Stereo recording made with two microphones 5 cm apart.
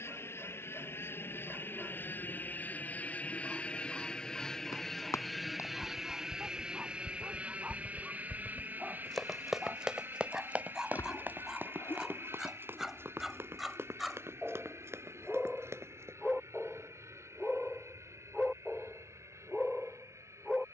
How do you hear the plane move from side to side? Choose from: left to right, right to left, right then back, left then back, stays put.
left to right.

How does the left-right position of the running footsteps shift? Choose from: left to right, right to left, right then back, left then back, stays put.
left to right.